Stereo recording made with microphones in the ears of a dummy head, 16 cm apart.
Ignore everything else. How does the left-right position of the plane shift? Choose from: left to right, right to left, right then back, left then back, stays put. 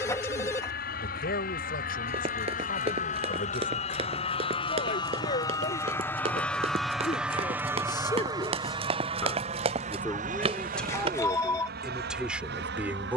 left to right.